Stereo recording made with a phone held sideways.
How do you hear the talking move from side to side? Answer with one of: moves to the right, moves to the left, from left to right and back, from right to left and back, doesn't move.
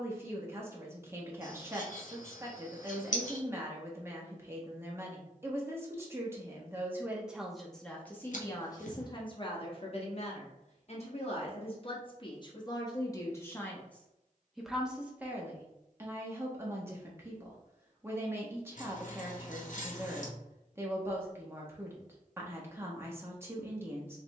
from right to left and back.